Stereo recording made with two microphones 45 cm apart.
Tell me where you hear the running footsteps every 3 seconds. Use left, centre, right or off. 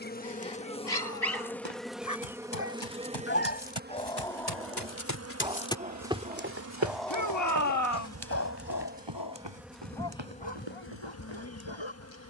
left, left, right, right.